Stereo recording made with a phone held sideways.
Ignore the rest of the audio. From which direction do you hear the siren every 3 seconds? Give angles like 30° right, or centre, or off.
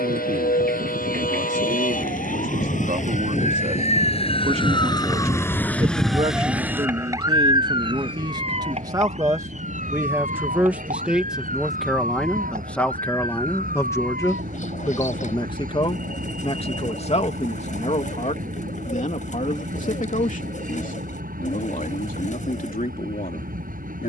70° left, 30° left, 20° right, 50° right, 60° right, 70° right, 70° right, 70° right.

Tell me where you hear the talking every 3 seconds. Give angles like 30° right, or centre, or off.
50° right, 50° right, 30° right, 10° right, 10° left, 40° left, 60° left, 60° left.